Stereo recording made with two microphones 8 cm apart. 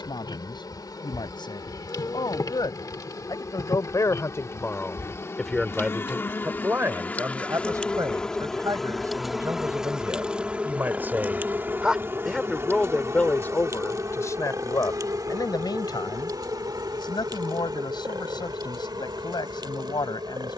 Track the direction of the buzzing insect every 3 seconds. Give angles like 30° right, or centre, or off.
50° left, 40° left, 20° left, 10° right, 40° right, 50° right, 60° right.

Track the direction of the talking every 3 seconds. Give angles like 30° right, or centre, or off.
70° left, 30° left, 40° right, 30° right, 20° left, 60° left, 60° left.